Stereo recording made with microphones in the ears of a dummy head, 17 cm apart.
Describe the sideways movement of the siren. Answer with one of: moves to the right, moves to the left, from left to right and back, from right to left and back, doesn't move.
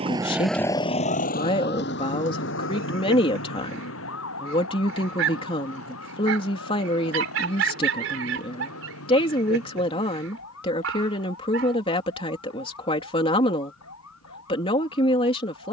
moves to the left.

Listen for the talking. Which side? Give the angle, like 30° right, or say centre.
30° left.